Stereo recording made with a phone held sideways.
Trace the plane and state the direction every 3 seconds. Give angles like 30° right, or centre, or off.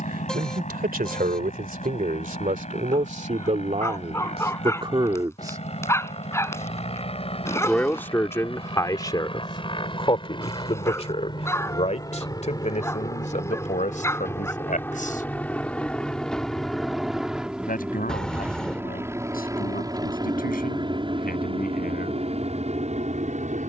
50° left, 50° left, 40° left, 30° left, 20° left, centre, 20° right, 40° right.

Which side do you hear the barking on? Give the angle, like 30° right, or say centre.
20° left.